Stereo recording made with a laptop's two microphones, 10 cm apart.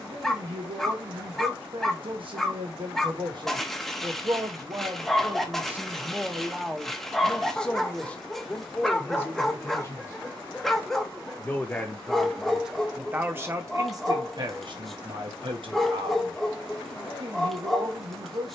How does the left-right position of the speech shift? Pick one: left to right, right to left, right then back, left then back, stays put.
left then back.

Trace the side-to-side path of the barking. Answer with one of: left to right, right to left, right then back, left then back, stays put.
stays put.